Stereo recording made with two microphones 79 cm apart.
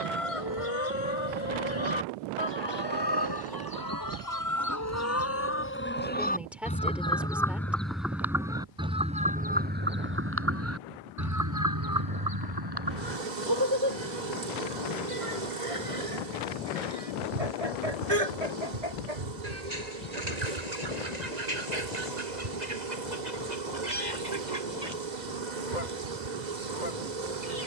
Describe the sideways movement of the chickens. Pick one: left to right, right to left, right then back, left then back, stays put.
left to right.